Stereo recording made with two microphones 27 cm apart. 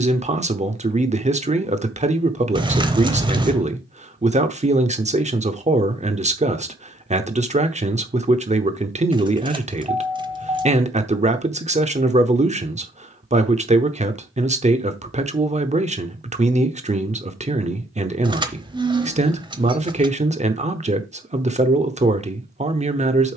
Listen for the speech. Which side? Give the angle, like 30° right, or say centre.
30° right.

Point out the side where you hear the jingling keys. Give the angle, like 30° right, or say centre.
20° right.